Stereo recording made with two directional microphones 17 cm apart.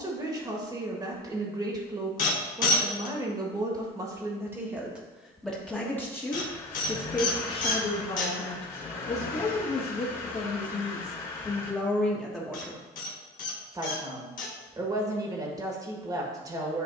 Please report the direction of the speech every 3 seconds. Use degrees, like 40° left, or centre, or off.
20° right, 10° right, 30° left, 30° left, 10° right, 20° right.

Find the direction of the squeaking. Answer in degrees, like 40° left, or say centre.
50° left.